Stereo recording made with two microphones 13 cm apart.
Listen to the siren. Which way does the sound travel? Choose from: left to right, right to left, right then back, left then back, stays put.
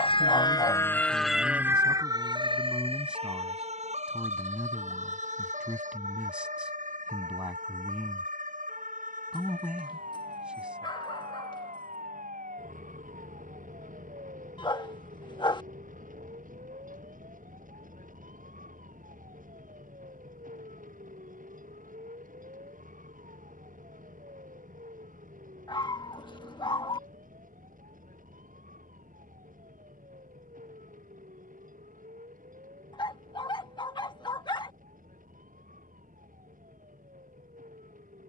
left to right.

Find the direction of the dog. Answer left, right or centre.
left.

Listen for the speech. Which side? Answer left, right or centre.
centre.